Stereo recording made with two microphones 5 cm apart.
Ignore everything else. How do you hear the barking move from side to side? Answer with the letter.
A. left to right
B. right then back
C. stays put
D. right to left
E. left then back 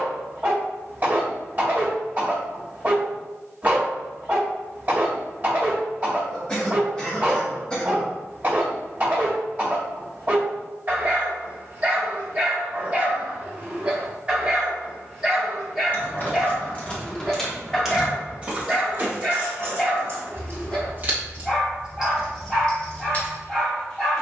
D.